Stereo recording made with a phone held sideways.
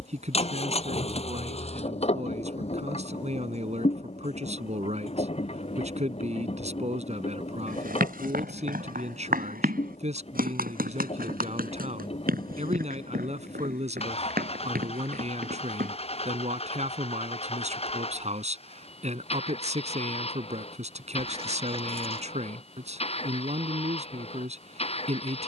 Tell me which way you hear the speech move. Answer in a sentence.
In this clip you hear the speech stay put.